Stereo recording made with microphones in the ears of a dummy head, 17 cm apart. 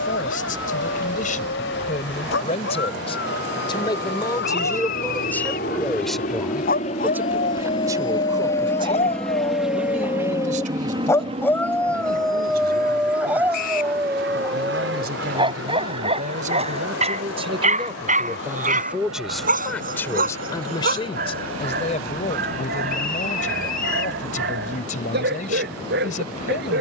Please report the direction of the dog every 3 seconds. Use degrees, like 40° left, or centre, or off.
70° left, 60° left, 50° left, 20° left, 10° right, 30° right, 50° right, 60° right, 60° right.